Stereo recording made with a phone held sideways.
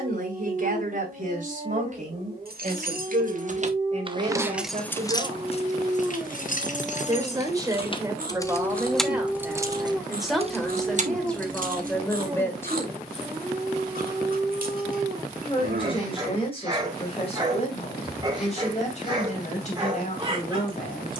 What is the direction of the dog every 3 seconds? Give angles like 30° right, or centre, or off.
30° right, 30° right, 10° right, 10° right, 20° right, 20° right, 30° right.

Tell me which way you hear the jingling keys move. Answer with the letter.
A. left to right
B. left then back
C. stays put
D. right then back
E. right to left
B.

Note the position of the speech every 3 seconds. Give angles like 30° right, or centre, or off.
50° right, 40° right, 20° right, centre, 10° left, 40° left, 40° left.